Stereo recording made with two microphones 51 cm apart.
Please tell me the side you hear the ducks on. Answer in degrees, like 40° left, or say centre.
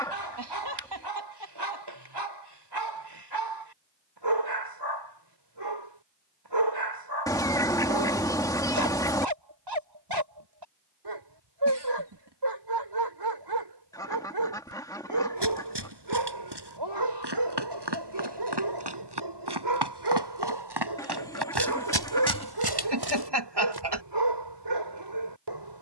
10° left.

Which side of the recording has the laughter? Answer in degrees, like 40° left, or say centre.
60° right.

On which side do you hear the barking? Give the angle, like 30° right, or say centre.
60° right.